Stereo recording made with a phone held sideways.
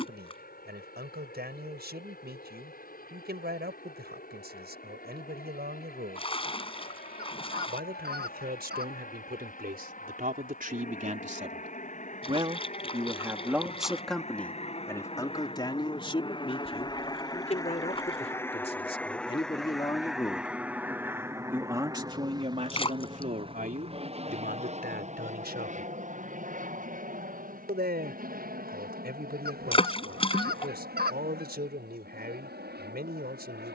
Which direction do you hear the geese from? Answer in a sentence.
You can hear the geese on the right.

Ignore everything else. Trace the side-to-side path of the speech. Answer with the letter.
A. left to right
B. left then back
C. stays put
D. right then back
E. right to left
B.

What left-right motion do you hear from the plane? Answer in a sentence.
In this clip you hear the plane travel towards the right.